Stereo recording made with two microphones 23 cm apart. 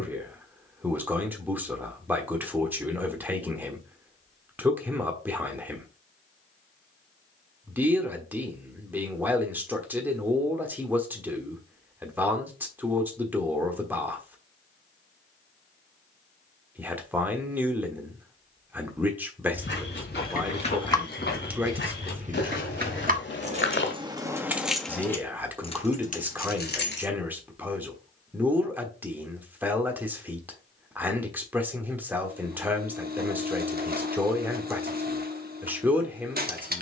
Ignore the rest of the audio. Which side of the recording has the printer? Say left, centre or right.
right.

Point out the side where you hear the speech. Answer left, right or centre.
centre.